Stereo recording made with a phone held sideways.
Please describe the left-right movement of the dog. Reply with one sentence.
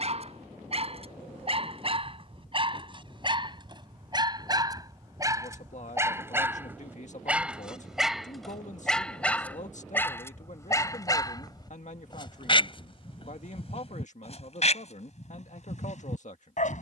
In this clip you hear the dog travel towards the left.